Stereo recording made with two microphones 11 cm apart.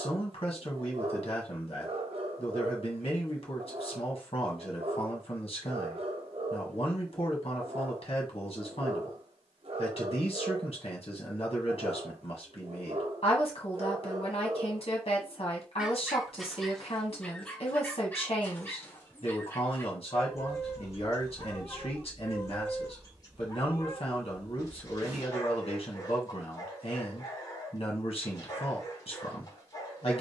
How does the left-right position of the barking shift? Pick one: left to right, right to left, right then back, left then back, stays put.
right to left.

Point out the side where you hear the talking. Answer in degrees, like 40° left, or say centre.
60° left.